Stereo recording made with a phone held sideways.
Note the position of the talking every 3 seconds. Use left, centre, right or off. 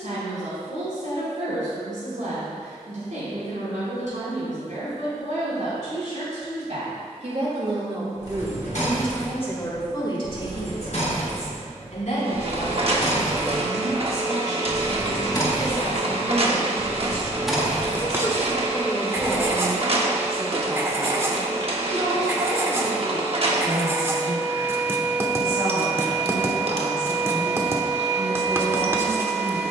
right, right, right, left, left, left, centre, right, right, right.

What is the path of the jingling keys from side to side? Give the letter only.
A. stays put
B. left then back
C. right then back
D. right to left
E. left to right
E.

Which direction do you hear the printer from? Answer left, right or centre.
right.